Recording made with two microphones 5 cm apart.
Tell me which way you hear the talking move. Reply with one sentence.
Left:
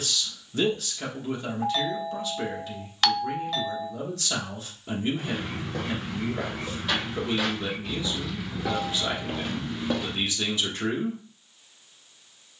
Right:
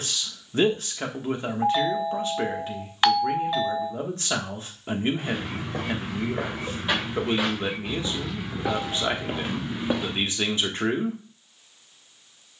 You can hear the talking stay put.